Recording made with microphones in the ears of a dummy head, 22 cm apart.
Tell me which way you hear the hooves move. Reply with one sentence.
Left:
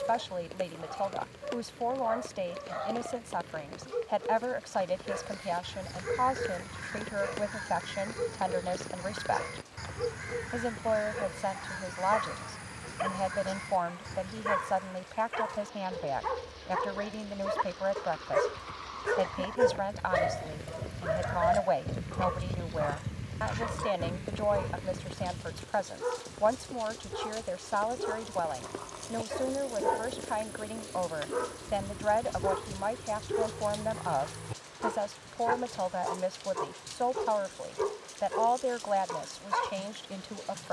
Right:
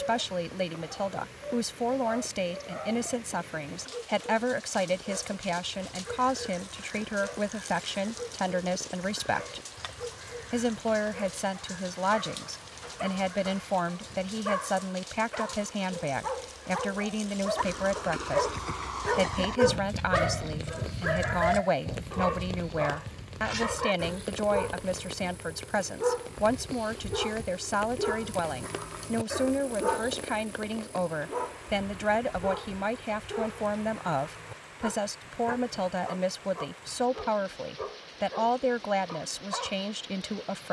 In this clip you hear the hooves move from right to left.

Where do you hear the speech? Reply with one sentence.
In this clip you hear the speech on the right.